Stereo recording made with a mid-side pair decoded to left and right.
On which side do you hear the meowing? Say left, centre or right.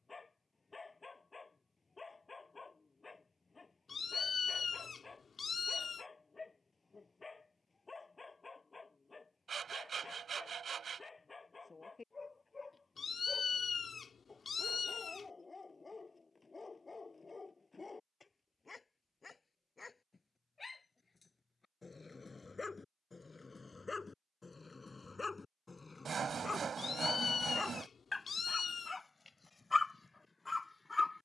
left.